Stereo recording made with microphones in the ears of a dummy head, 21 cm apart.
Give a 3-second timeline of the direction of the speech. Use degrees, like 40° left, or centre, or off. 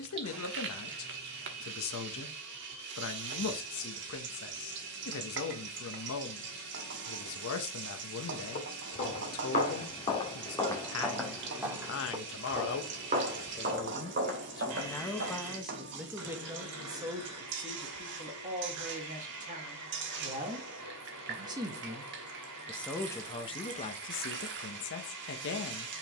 60° left, 60° left, 60° left, 60° left, 40° left, 10° right, 30° right, centre, 50° left.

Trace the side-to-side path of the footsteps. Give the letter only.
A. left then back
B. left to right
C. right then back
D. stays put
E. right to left
B.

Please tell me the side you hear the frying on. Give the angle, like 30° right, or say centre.
50° right.